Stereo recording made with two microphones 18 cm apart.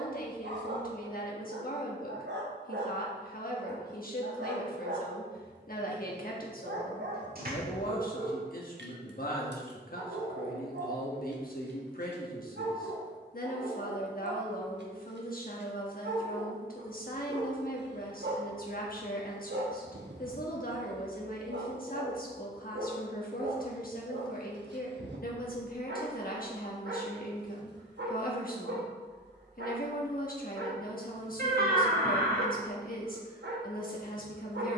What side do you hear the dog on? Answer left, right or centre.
right.